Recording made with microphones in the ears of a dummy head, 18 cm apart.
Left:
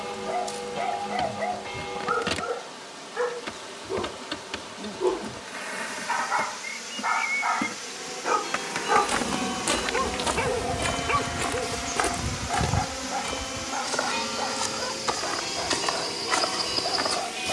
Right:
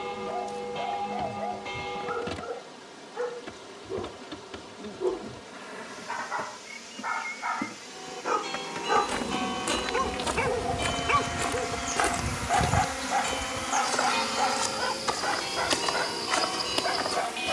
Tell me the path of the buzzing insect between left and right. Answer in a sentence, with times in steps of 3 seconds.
You can hear the buzzing insect on the left from 0 s, in the centre from 9 s and on the right from 12 s.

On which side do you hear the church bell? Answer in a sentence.
In this clip you hear the church bell in the centre.